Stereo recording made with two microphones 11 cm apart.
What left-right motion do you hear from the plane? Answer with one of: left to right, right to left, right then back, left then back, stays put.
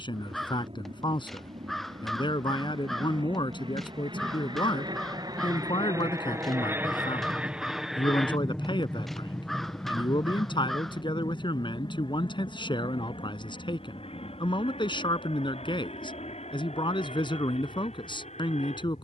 right to left.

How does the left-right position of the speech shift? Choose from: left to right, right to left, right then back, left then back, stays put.
stays put.